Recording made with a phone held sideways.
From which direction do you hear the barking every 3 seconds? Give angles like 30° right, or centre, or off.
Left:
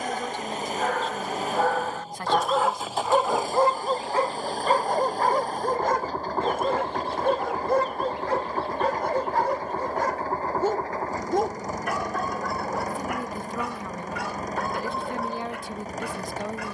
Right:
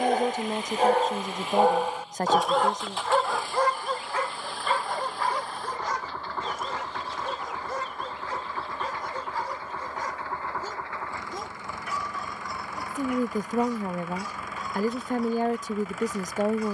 20° right, 40° left, 60° left, 70° left, 70° left, 70° left.